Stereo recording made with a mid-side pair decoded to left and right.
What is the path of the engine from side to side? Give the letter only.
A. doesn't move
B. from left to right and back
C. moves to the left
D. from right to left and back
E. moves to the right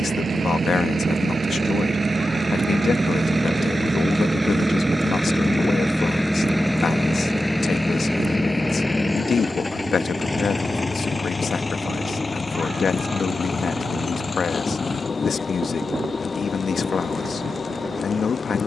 C.